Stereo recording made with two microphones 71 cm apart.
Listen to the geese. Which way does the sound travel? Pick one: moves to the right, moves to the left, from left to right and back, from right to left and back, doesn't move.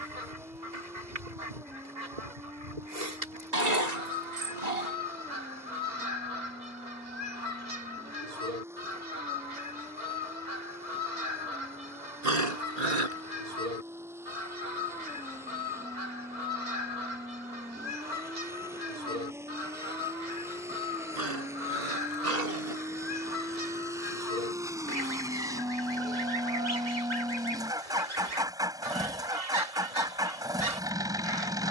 doesn't move.